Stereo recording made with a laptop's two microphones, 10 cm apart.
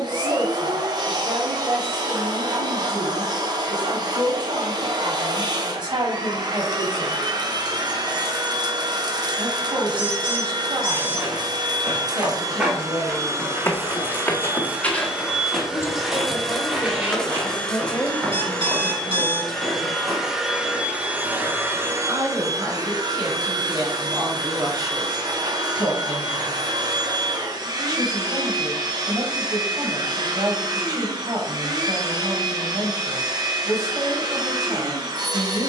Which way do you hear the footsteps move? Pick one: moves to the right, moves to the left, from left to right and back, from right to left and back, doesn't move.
from right to left and back.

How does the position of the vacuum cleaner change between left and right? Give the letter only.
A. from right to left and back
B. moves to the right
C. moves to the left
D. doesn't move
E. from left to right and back
A.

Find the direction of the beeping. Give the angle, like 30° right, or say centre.
60° right.